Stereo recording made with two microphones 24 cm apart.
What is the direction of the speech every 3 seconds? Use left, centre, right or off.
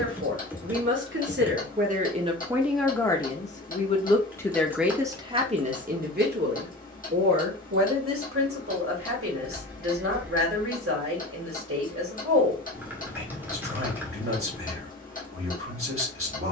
right, centre, right, right, right, right.